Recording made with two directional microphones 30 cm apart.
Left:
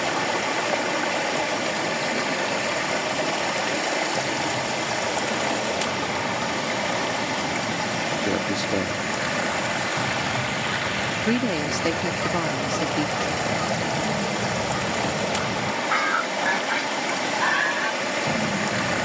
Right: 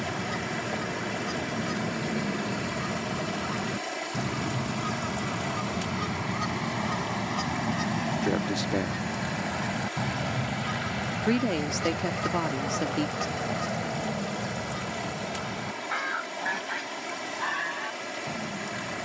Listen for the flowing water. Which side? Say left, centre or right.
left.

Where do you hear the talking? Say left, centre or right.
centre.